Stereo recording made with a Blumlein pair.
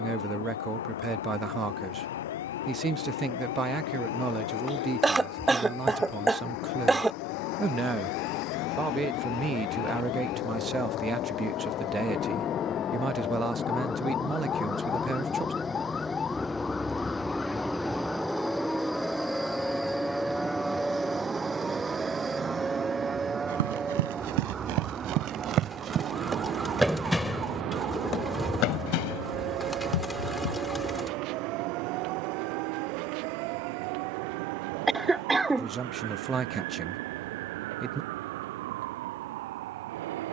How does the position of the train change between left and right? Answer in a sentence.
You can hear the train travel towards the right.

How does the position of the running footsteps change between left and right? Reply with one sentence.
You can hear the running footsteps move from right to left.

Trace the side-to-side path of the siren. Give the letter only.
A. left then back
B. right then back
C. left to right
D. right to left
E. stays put
C.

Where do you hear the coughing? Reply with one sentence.
You can hear the coughing in the centre.